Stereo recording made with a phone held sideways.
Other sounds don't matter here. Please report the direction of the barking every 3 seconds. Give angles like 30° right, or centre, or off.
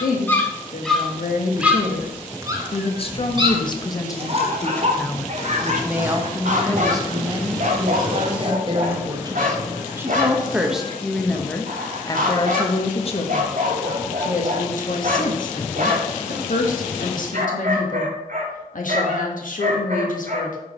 10° right, 40° right, 60° right, 60° right, 60° right, 60° right, 60° right.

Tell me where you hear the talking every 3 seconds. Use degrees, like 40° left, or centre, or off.
60° left, 20° left, 30° right, 10° right, 50° left, 70° left, 70° left.